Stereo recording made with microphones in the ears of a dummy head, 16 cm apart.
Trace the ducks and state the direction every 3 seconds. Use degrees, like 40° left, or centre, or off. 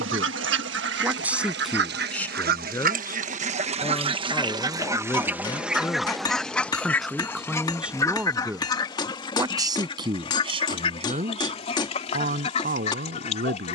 70° right, 30° right, 10° left, 30° left, 40° left.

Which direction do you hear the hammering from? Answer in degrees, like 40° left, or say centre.
20° left.